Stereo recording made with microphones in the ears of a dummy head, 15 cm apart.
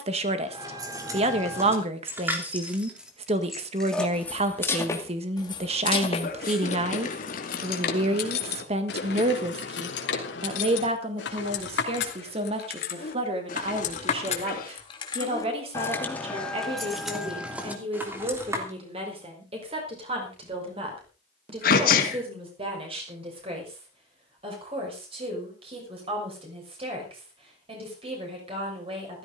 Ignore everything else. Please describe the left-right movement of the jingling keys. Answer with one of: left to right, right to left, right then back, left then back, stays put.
left then back.